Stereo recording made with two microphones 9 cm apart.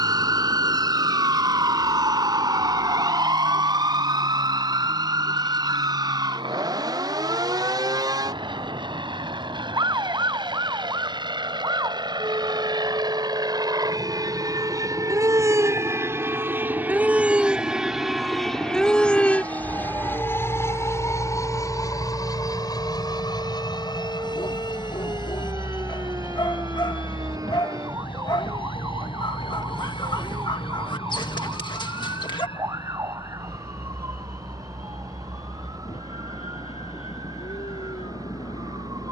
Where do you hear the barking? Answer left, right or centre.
left.